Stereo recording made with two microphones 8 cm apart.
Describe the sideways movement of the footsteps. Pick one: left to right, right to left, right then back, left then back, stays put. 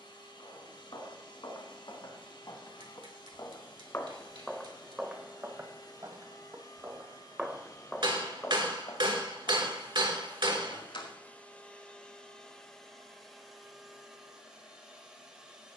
right then back.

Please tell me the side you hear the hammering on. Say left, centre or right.
right.